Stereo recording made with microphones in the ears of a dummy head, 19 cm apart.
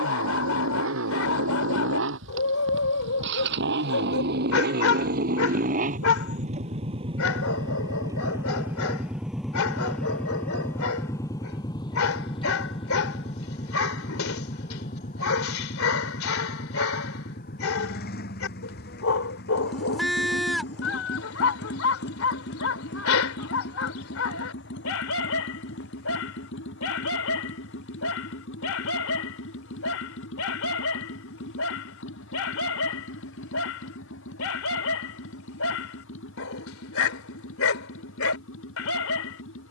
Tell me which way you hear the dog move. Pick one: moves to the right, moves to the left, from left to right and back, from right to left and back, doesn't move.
doesn't move.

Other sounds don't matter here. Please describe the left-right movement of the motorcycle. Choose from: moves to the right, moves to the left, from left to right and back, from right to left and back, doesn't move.
moves to the left.